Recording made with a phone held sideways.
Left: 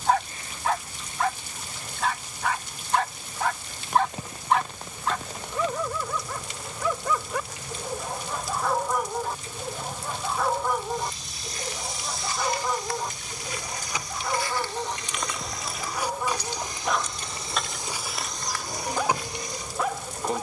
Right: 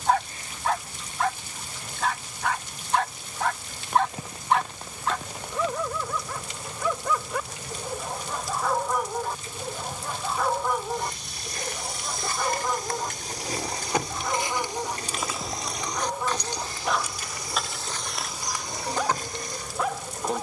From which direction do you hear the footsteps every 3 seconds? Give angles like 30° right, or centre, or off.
off, off, off, 60° right, 30° right, 10° left, 30° right.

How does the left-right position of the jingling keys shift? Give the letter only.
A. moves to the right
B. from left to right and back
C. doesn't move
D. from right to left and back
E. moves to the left
E.